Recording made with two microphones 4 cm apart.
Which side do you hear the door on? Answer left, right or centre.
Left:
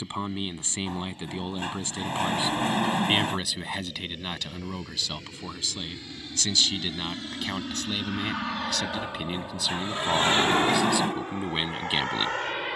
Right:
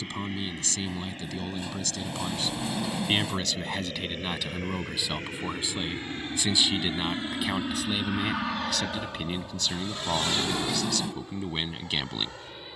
left.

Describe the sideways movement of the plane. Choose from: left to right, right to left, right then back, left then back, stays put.
right to left.